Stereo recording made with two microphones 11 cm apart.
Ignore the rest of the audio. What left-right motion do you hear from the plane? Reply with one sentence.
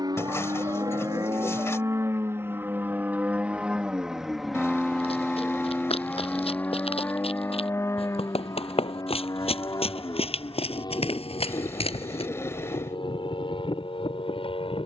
You can hear the plane move to the left.